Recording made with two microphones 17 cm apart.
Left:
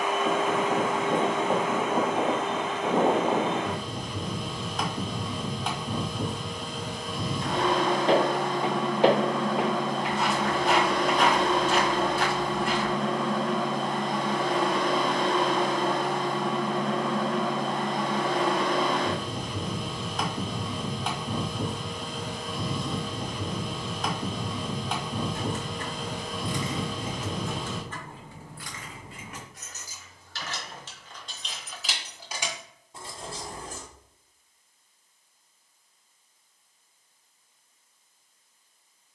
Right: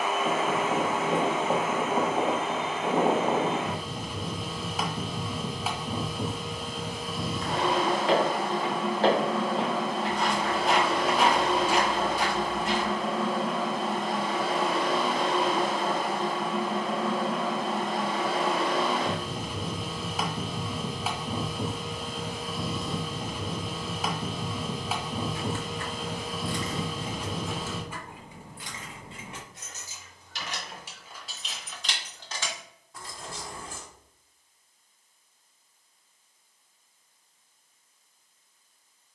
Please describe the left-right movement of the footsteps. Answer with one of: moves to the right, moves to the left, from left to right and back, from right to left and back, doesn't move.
moves to the right.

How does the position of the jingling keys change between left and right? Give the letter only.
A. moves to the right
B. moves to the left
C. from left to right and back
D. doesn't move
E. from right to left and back
C.